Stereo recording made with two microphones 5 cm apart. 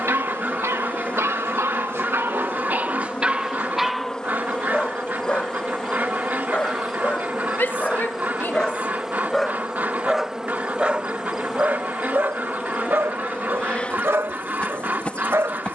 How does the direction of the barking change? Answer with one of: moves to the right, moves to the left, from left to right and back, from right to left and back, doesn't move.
from right to left and back.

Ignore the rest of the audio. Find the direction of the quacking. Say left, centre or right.
right.